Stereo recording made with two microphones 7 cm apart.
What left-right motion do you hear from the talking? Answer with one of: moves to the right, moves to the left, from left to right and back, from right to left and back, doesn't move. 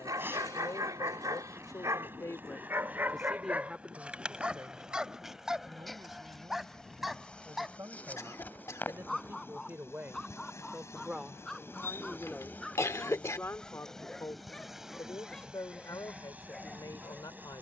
from left to right and back.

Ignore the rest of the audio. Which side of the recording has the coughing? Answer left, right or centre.
left.